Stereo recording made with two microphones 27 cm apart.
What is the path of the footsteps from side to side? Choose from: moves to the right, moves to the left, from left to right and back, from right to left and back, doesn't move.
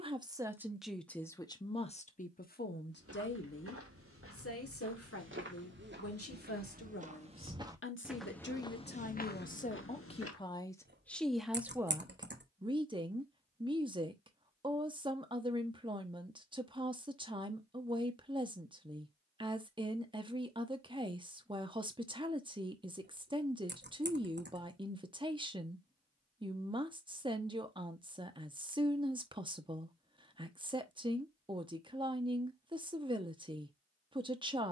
moves to the left.